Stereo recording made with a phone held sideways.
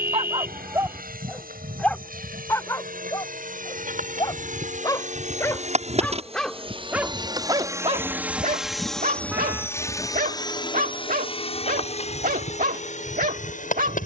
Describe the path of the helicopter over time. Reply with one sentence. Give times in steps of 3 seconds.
You can hear the helicopter on the right from 0 s and on the left from 9 s.